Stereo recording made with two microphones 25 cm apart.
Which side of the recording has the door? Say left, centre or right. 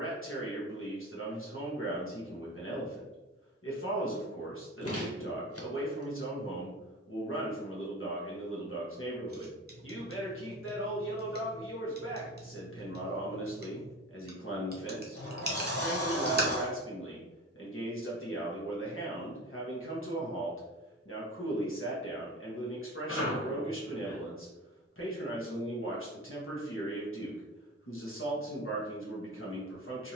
left.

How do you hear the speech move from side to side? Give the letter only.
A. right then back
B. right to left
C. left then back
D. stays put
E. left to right
D.